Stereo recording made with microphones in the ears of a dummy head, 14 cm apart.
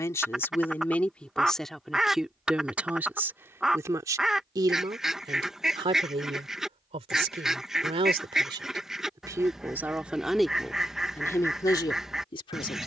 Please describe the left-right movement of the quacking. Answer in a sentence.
In this clip you hear the quacking stay put.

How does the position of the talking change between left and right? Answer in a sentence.
In this clip you hear the talking move from left to right and back again.